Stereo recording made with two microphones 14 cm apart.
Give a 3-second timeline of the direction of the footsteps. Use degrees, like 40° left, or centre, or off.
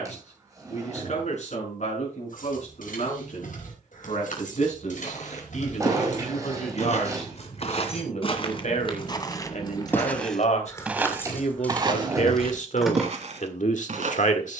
off, 60° left, 50° left, centre, 50° right.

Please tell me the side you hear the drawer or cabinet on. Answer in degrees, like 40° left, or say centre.
20° right.